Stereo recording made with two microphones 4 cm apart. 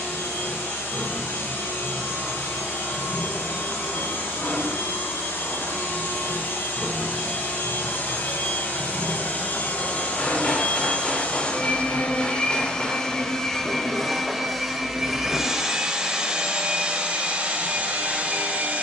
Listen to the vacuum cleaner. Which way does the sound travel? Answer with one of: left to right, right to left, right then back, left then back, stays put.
left to right.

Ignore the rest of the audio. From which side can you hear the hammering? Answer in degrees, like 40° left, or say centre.
30° left.